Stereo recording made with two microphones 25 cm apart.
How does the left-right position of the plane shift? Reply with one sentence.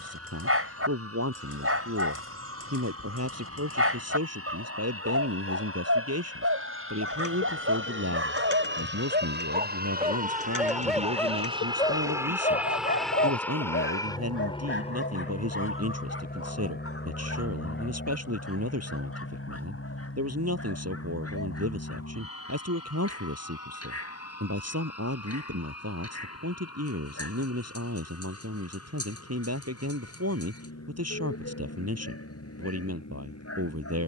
You can hear the plane move to the left.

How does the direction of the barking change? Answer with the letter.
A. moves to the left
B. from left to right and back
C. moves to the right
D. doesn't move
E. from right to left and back
A.